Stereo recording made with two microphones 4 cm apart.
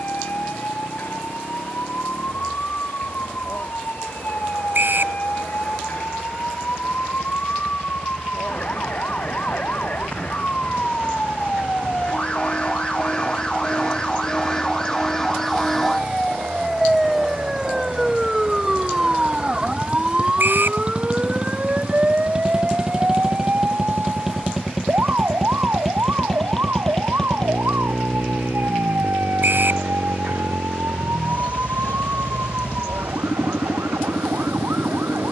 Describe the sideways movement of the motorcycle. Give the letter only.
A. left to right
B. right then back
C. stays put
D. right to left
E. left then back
D.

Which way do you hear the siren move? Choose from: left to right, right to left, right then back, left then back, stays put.
left to right.